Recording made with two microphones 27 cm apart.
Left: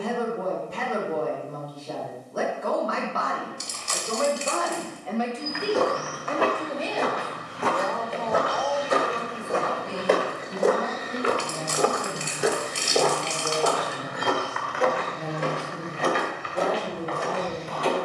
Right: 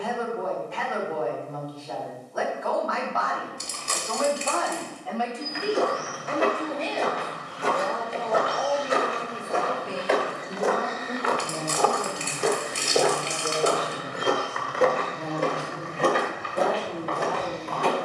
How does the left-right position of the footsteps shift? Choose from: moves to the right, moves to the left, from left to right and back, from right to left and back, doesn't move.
moves to the right.